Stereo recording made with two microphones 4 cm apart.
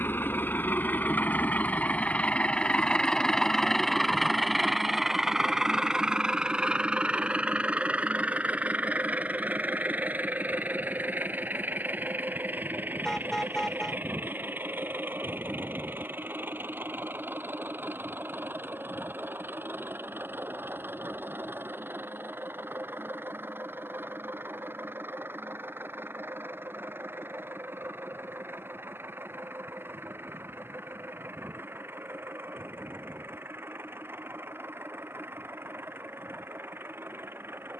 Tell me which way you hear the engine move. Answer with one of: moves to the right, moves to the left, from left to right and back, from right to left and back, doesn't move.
moves to the right.